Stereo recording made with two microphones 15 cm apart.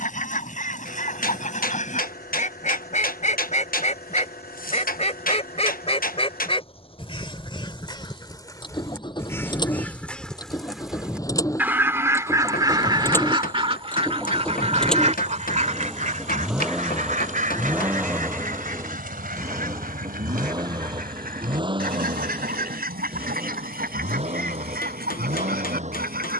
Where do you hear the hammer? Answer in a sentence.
You can hear the hammer on the left.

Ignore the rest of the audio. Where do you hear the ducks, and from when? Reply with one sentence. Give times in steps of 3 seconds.
You can hear the ducks on the left from 0 s, in the centre from 9 s and on the right from 12 s.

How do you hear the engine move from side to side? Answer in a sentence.
In this clip you hear the engine go from the left side to the right.